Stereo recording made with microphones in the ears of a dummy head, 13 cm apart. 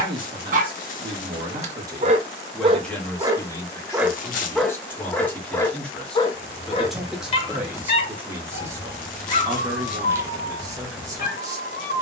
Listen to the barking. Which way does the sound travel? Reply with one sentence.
You can hear the barking travel towards the left.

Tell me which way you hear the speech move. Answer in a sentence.
In this clip you hear the speech go left and come back.